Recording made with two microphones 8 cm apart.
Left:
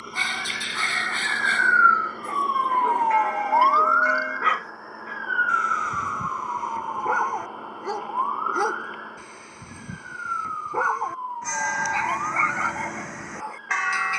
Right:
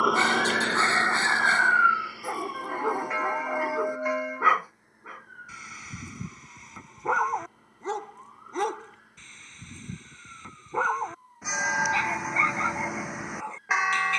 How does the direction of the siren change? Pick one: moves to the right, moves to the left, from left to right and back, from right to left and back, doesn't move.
moves to the left.